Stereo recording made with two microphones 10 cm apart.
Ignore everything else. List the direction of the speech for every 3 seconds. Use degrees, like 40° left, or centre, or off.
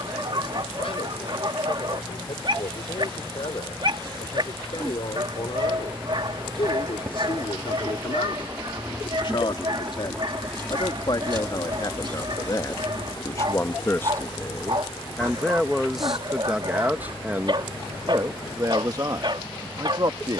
70° left, 70° left, 60° left, 50° left, 30° left, 10° right, 40° right.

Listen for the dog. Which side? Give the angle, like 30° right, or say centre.
50° right.